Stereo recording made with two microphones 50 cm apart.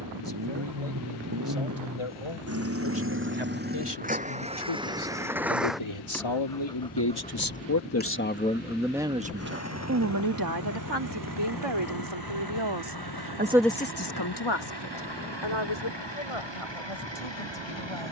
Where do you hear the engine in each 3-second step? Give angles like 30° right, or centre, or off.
40° right, 10° right, 10° left, 30° left, 50° left, 60° left.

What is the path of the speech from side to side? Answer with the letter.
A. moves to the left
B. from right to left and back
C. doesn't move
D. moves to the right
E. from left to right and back
E.